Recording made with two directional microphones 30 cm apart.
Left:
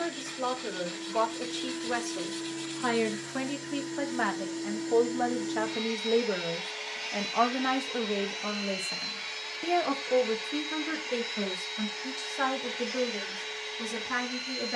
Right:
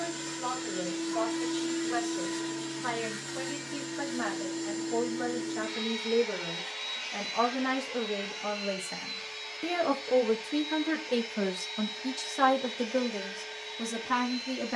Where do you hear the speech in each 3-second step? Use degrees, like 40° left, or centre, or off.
70° left, 50° left, 20° left, 20° right, 30° right.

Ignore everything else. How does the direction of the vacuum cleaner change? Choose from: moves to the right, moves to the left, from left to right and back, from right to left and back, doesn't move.
moves to the left.